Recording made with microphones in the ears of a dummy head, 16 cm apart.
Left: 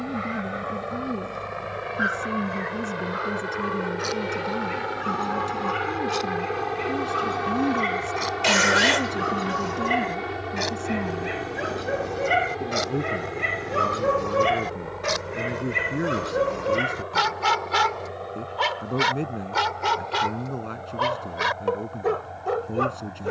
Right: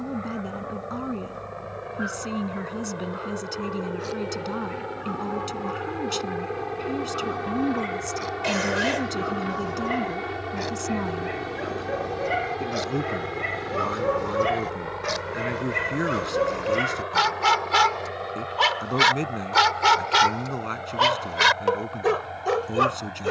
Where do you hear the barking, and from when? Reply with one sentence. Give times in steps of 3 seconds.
You can hear the barking on the left from 0 s, in the centre from 15 s and on the right from 18 s.